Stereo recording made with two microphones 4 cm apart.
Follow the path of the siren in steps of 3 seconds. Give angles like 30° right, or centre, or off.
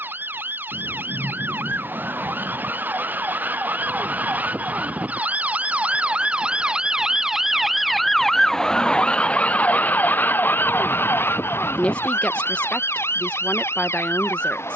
60° right, 40° right, 10° right, 50° left, 80° left.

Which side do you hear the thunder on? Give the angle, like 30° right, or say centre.
70° right.